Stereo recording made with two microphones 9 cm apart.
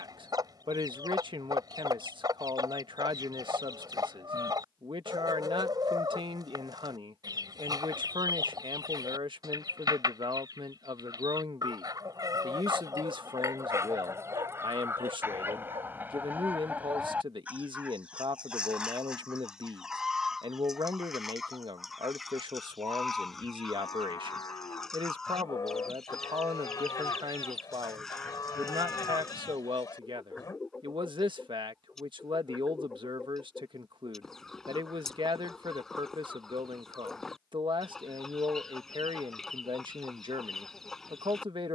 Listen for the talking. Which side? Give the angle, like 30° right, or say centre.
70° right.